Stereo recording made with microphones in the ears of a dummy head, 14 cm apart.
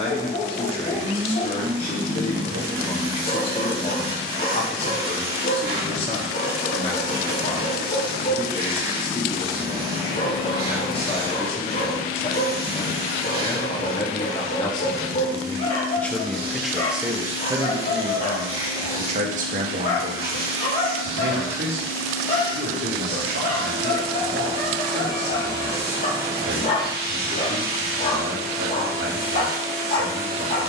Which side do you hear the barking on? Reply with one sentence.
In this clip you hear the barking on the left.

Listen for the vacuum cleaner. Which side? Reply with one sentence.
You can hear the vacuum cleaner on the right.